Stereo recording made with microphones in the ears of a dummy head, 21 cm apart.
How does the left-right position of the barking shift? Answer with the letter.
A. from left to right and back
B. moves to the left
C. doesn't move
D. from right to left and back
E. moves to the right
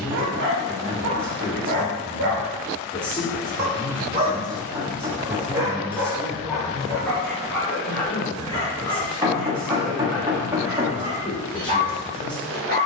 D.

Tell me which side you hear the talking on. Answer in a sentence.
In this clip you hear the talking in the centre.